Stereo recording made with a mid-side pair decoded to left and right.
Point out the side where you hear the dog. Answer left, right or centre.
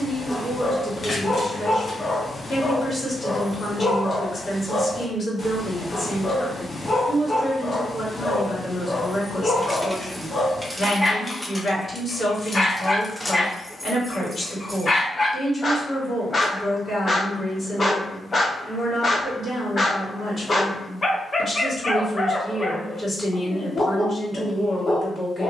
left.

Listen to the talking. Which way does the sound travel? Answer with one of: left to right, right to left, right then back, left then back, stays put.
stays put.